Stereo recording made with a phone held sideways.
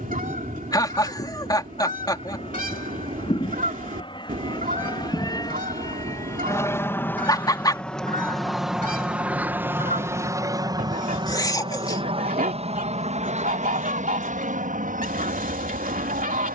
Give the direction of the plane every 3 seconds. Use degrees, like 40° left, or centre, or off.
50° left, 30° left, 10° left, 20° right, 50° right, 60° right.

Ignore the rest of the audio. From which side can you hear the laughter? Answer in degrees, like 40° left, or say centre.
30° left.